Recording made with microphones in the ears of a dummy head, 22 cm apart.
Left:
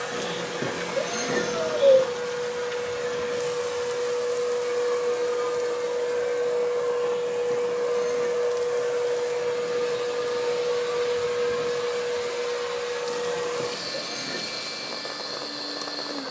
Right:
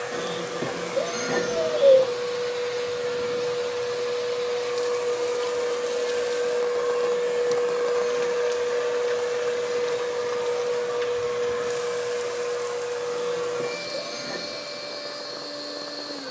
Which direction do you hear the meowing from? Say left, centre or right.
centre.